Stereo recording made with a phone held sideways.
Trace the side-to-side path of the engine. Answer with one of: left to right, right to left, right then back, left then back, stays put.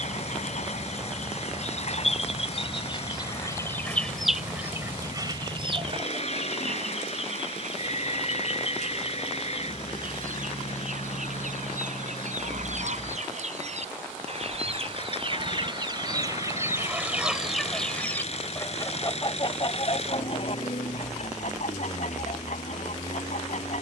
stays put.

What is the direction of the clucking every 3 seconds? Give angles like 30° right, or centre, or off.
50° left, 10° right, 60° right, 70° right, 60° right, 20° right, 30° left, 60° left.